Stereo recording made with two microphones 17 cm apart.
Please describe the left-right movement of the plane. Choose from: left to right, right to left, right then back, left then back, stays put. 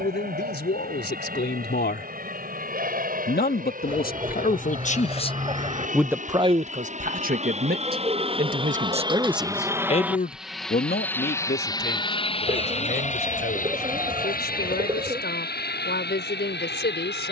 right to left.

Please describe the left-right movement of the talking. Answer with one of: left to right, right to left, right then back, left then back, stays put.
right then back.